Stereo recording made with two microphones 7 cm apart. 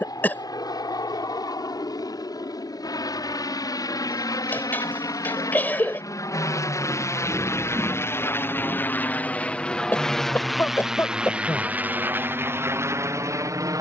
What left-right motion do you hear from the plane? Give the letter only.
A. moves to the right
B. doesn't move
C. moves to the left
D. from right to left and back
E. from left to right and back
A.